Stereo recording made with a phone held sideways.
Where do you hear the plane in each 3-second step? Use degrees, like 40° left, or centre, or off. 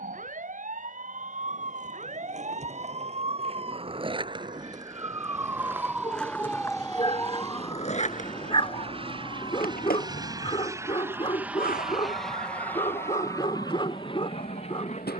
60° right, 60° right, 50° right, 20° right, 20° left.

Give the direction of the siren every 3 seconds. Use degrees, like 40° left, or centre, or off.
50° right, 30° right, 20° left, 50° left, 70° left.